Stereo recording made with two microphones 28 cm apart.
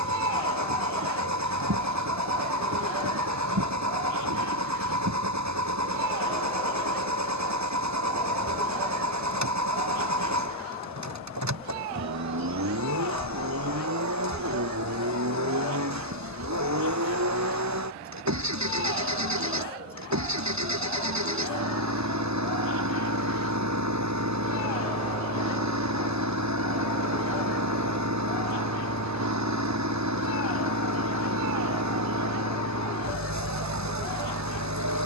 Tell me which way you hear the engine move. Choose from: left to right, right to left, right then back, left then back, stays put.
stays put.